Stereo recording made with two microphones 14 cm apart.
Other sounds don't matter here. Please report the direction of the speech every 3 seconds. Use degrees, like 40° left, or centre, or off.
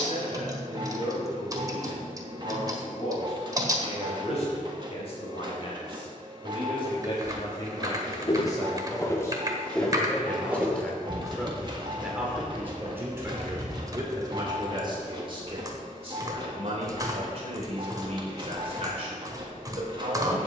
50° left, 50° left, 30° left, 10° left, 20° right, 40° right, 40° right.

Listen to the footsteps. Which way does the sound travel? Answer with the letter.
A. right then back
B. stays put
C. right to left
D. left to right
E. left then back
D.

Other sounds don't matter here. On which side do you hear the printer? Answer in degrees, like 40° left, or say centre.
30° right.